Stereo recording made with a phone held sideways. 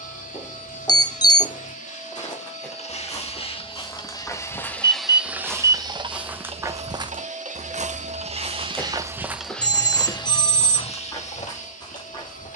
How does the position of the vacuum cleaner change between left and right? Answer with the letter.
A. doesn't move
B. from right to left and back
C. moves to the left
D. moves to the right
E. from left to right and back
E.